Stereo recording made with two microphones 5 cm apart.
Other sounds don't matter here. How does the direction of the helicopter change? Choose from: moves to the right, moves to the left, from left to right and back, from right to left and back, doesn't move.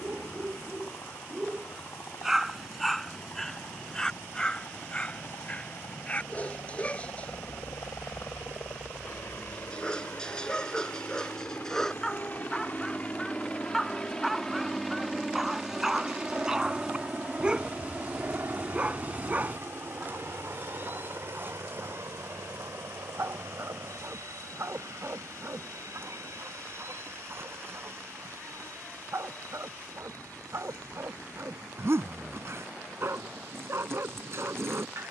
moves to the right.